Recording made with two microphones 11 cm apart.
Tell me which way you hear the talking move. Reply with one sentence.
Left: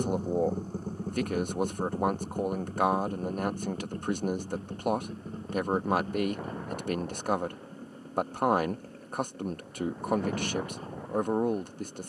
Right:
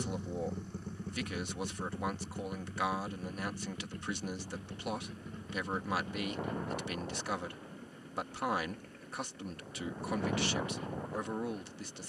You can hear the talking stay in one place.